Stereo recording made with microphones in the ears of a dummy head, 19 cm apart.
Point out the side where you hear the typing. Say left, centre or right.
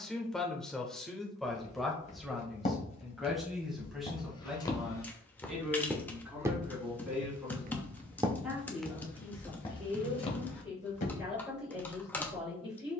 centre.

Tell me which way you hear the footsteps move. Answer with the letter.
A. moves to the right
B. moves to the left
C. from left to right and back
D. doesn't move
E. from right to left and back
C.